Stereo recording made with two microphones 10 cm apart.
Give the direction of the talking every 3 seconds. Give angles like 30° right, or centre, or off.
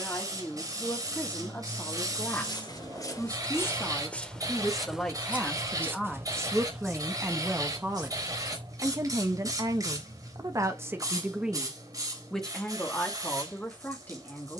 20° left, 10° left, 10° right, 30° right, 20° left.